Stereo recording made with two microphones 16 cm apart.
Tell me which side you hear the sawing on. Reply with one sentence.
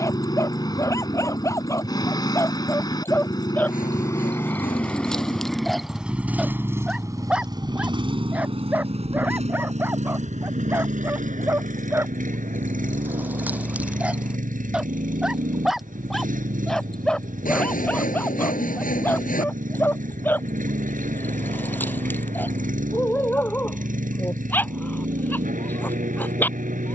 You can hear the sawing on the left.